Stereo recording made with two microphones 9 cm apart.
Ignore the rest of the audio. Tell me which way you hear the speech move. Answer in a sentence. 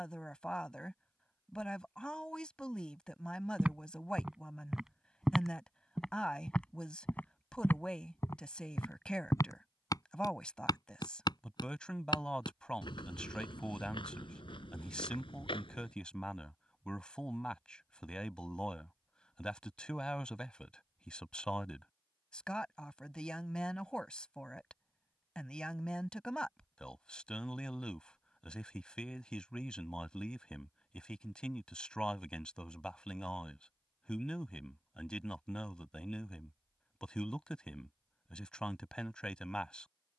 You can hear the speech stay in one place.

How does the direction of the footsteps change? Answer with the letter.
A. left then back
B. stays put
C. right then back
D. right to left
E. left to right
D.